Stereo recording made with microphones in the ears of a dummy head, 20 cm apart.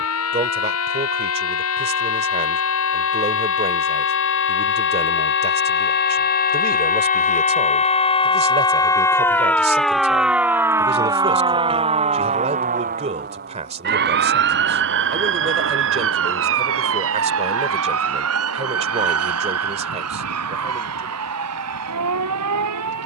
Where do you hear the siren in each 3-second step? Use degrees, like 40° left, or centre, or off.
60° left, 50° left, 30° left, 10° right, 40° right, 60° right, 70° right, 70° right.